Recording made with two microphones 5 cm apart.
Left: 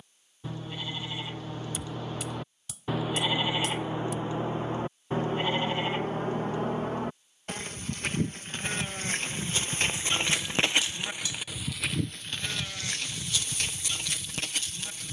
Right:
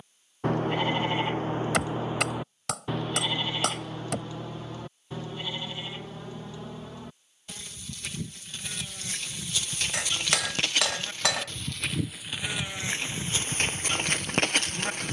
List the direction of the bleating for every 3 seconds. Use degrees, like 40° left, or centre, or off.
30° right, 30° left, 50° left, 20° left, 30° right.